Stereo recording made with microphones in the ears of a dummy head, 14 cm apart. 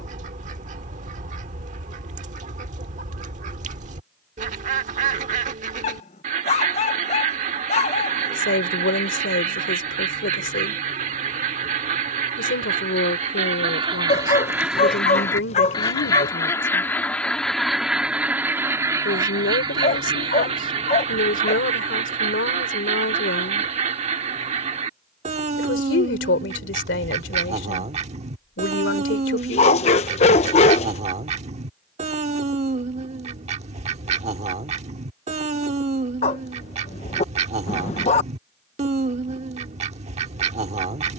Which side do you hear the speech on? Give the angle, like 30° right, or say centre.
80° left.